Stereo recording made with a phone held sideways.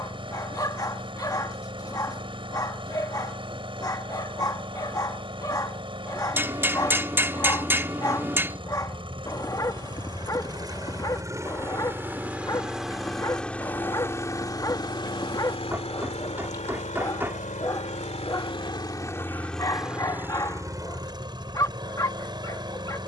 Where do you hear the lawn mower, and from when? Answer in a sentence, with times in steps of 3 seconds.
You can hear the lawn mower on the right from 0 s, in the centre from 12 s, on the left from 15 s, in the centre from 18 s and on the right from 21 s.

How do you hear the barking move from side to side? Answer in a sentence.
In this clip you hear the barking stay put.